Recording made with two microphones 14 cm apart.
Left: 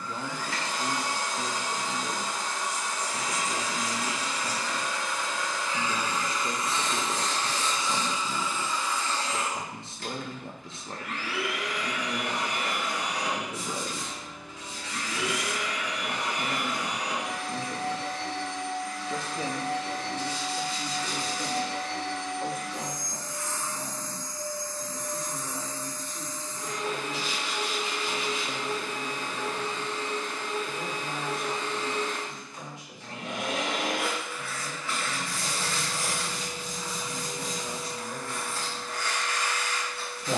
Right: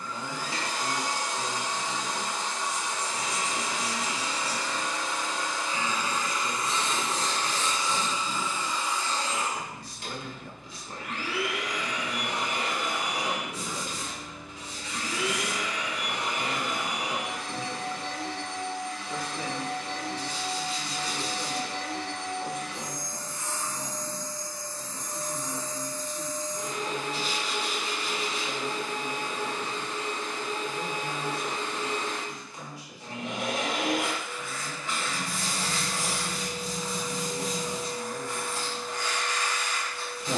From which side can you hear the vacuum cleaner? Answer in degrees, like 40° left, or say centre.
20° right.